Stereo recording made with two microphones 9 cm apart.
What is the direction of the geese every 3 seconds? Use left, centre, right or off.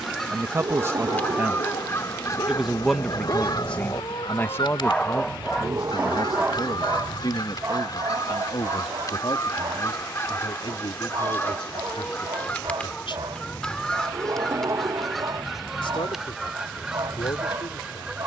left, left, left, left, centre, centre.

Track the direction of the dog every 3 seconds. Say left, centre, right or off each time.
left, left, right, right, right, right.